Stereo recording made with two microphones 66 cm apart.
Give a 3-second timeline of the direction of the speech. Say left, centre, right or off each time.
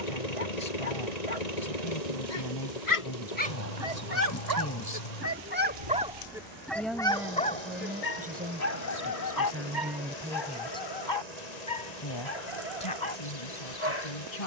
left, left, centre, centre, left.